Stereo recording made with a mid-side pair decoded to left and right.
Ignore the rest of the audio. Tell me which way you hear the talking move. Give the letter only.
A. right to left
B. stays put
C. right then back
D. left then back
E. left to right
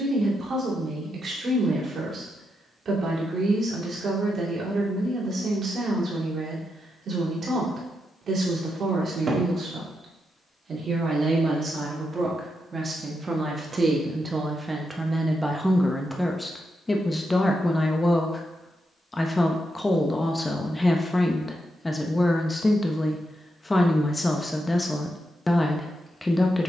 A.